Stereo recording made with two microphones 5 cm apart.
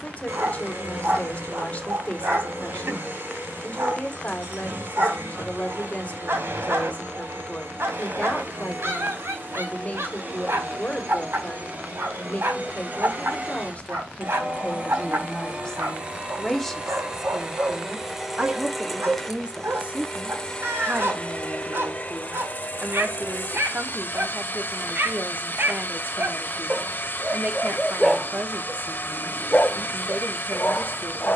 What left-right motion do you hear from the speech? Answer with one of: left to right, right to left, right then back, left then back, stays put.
left to right.